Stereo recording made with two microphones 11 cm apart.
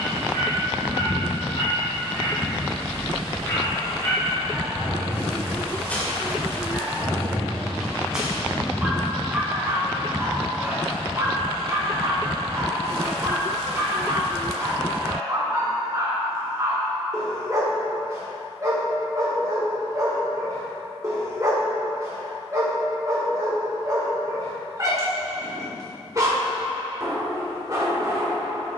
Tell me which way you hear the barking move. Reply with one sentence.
You can hear the barking go from the left side to the right.